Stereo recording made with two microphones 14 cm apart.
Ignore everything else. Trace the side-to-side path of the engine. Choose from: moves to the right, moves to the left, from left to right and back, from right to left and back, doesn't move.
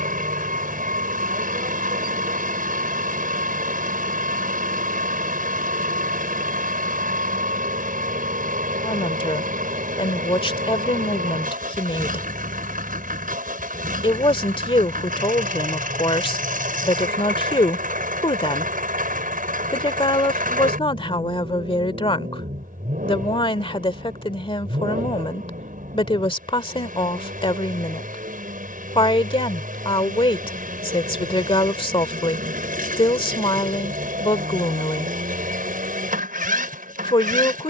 doesn't move.